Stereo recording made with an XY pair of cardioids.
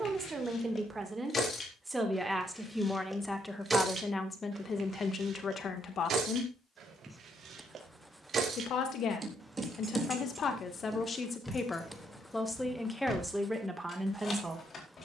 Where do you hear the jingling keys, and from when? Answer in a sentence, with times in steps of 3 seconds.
In this clip you hear the jingling keys on the left from 0 s, on the right from 3 s, in the centre from 9 s and on the left from 12 s.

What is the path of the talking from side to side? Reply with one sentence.
You can hear the talking go left and come back.